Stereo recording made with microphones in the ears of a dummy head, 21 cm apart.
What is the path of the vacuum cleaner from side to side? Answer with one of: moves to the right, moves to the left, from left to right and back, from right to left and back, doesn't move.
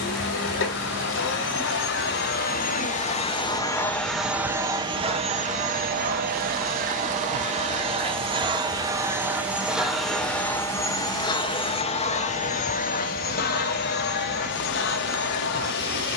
from left to right and back.